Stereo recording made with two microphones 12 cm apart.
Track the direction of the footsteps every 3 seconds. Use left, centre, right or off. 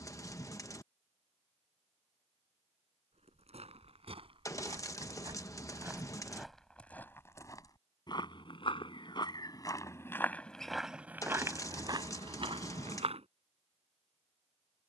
off, right, left, centre, right.